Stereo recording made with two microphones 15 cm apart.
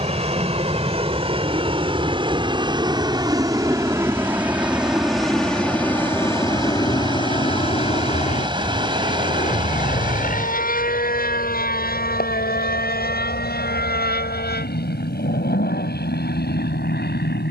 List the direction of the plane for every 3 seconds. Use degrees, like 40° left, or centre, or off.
40° right, 10° right, 30° left, 60° left, 70° left, 80° left.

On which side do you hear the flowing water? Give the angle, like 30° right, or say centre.
30° right.